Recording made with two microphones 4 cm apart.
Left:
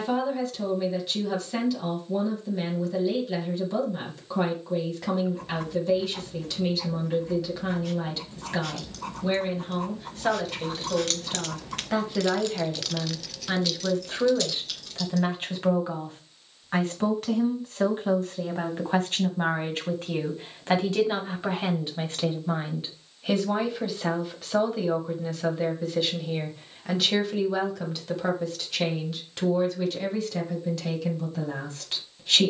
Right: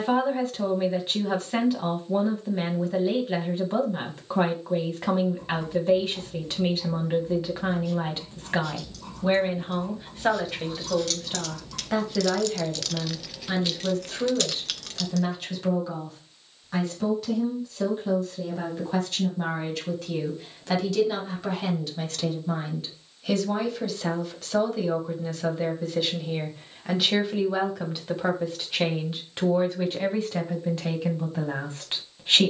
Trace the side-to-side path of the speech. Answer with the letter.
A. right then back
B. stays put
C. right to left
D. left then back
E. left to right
D.